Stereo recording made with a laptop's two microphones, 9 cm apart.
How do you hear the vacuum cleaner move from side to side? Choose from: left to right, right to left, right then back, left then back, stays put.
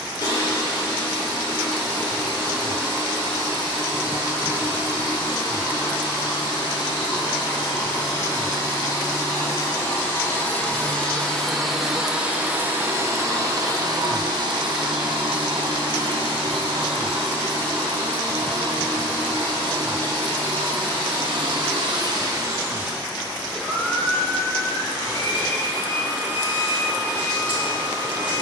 right then back.